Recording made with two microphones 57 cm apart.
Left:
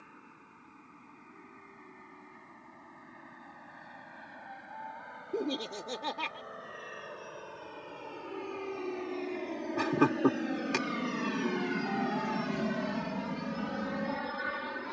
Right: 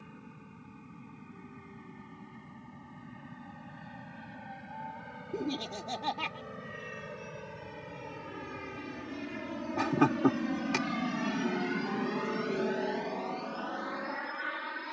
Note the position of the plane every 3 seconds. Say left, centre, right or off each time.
right, right, right, right, left.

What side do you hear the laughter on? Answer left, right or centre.
centre.